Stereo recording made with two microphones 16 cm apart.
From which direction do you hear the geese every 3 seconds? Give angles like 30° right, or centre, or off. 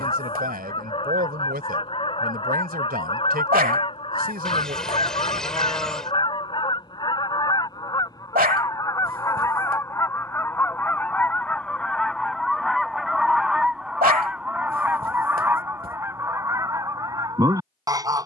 30° left, 30° left, 30° left, 10° left, centre, 20° right.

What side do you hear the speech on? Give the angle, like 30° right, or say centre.
70° right.